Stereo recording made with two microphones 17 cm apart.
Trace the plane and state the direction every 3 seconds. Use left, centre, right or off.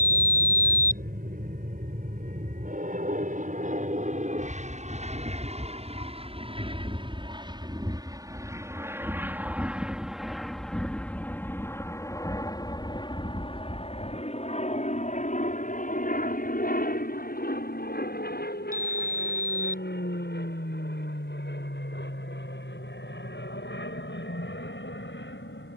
right, right, right, centre, left, left, left, left, left.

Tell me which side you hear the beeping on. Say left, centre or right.
left.